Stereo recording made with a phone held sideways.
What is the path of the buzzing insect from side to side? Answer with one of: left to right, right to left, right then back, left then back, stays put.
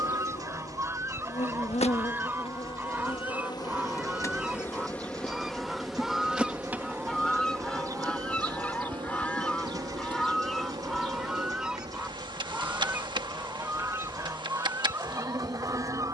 left to right.